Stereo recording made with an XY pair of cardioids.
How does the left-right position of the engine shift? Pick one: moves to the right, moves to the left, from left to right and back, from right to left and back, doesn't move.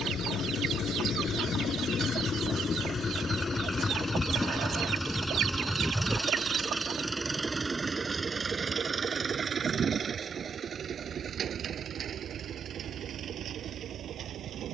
moves to the right.